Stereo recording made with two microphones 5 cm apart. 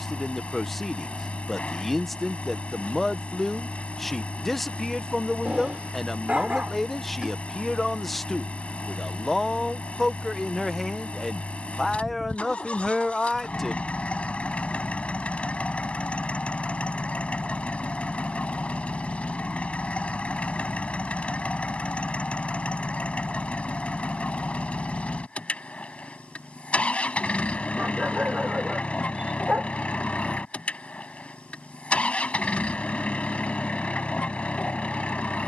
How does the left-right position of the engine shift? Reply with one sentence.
In this clip you hear the engine stay in one place.